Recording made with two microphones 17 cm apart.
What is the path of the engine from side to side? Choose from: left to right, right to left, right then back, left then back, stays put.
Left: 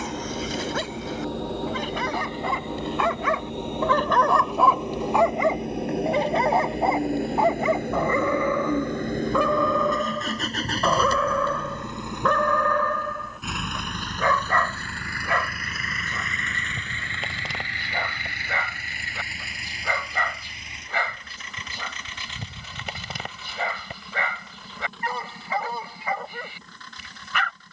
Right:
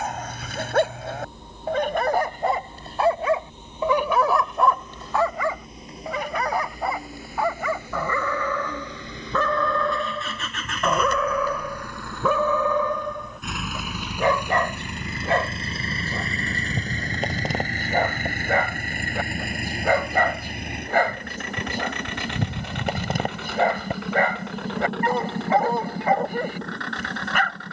left to right.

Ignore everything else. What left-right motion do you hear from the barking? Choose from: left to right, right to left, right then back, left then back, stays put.
left then back.